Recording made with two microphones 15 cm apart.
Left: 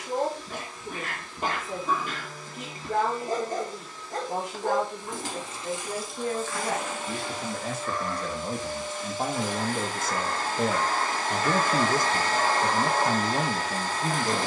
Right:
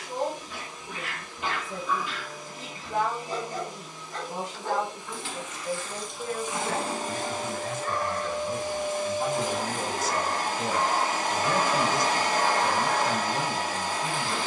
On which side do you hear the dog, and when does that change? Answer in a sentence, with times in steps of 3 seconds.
In this clip you hear the dog on the left from 0 s, on the right from 6 s and on the left from 12 s.